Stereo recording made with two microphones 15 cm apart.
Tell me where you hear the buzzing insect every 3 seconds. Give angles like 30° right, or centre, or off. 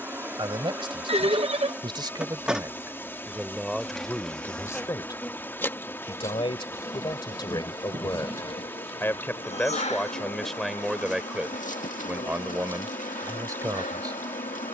10° right, 10° left, 30° left, 50° left, 60° left.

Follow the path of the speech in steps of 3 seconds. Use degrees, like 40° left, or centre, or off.
30° right, 10° left, 30° left, centre, 20° right.